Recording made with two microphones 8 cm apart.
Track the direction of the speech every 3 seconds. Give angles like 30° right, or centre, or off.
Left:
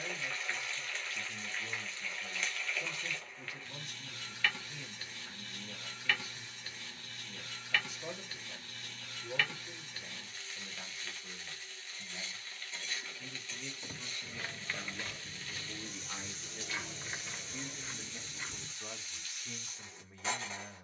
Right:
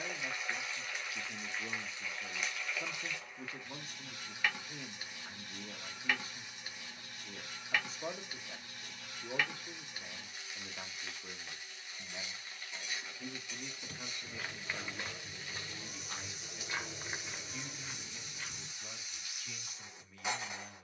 40° right, 40° right, 40° right, 40° right, 30° right, 10° left, 30° left.